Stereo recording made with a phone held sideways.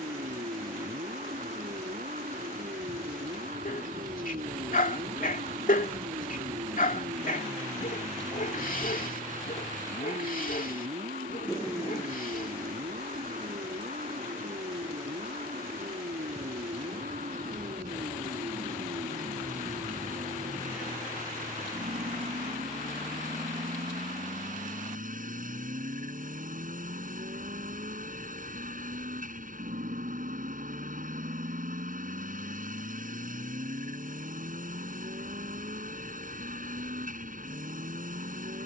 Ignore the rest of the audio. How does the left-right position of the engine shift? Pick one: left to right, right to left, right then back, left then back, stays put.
stays put.